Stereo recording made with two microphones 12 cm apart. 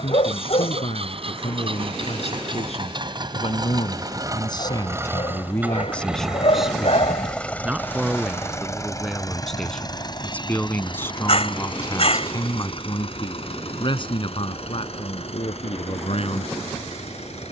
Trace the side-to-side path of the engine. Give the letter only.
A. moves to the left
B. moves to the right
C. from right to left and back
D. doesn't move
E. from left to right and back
A.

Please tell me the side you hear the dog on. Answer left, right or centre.
left.